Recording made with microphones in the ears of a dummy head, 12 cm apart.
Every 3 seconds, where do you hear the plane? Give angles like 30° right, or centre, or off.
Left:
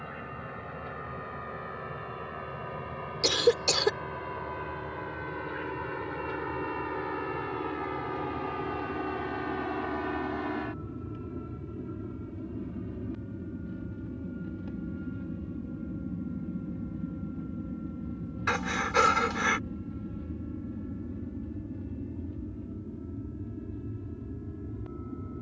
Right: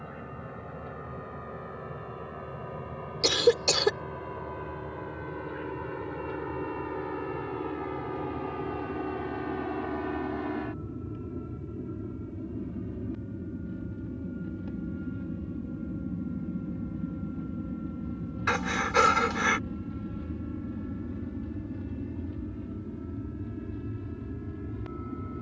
50° left, 50° left, 40° left, 30° left, 20° left, centre, 20° right, 40° right, 50° right.